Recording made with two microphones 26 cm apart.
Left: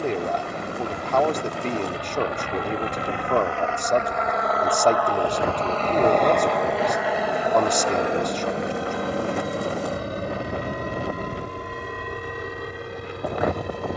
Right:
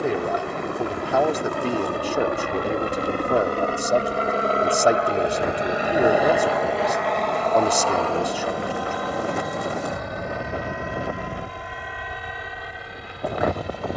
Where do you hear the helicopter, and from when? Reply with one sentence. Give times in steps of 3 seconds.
In this clip you hear the helicopter on the right from 0 s, in the centre from 6 s and on the left from 9 s.